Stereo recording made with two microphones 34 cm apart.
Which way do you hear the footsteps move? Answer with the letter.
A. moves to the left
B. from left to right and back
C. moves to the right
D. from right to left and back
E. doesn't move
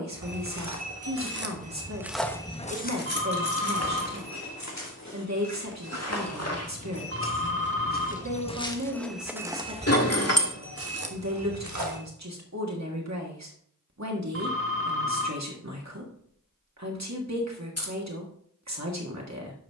D.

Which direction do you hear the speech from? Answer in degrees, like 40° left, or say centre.
50° right.